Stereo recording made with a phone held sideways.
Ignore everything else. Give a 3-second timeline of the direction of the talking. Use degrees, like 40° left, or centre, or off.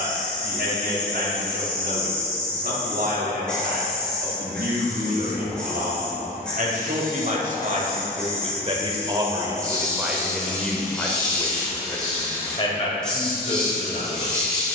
70° right, 70° right, 50° right, centre, 40° left.